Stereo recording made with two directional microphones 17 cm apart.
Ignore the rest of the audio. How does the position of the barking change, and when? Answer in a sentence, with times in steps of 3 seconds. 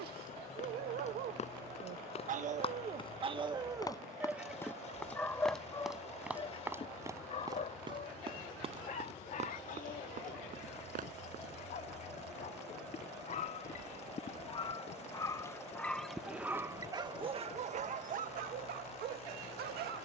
You can hear the barking on the right from 0 s, in the centre from 3 s, on the left from 6 s, in the centre from 15 s and on the right from 18 s.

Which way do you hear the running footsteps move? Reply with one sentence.
In this clip you hear the running footsteps move to the right.